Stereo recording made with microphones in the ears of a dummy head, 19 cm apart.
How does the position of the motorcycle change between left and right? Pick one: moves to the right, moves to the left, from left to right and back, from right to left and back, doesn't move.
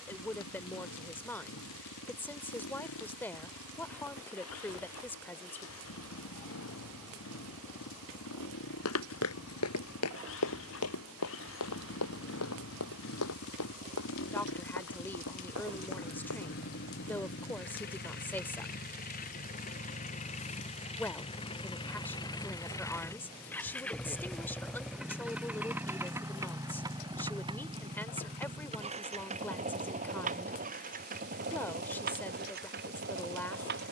moves to the right.